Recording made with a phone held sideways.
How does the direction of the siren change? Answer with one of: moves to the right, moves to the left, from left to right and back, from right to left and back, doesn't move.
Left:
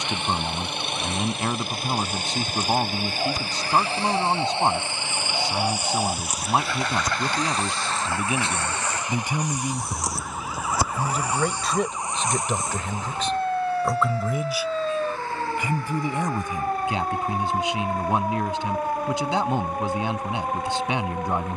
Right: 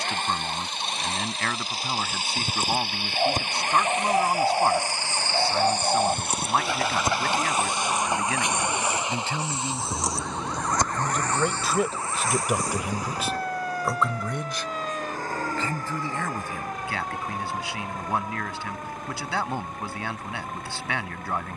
moves to the left.